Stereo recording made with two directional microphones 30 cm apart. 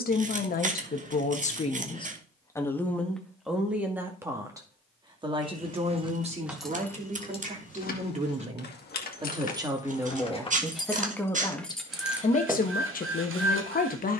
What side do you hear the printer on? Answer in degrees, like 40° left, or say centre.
40° right.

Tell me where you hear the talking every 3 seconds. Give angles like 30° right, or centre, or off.
20° left, 10° right, 20° right, centre, 30° left.